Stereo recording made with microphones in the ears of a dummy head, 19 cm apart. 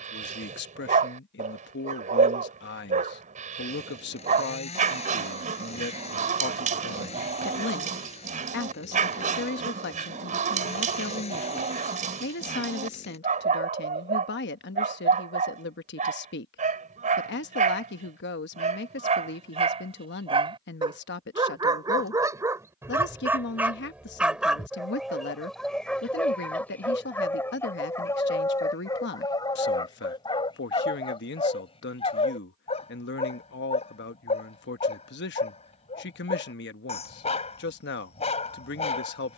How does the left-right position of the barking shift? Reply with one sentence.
You can hear the barking go from the right side to the left.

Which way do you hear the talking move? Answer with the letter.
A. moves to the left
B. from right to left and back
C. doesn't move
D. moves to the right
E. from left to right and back
C.